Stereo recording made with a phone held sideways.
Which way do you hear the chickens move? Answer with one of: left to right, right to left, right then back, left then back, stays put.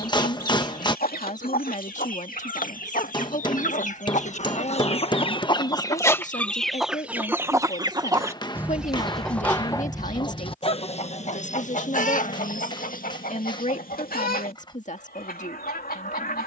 right then back.